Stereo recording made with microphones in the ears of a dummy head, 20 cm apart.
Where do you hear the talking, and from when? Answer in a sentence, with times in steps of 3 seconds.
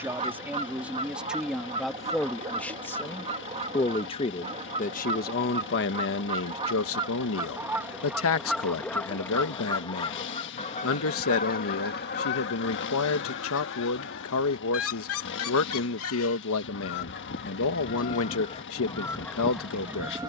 You can hear the talking in the centre from 0 s and on the left from 3 s.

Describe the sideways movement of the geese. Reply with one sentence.
You can hear the geese move from right to left and back again.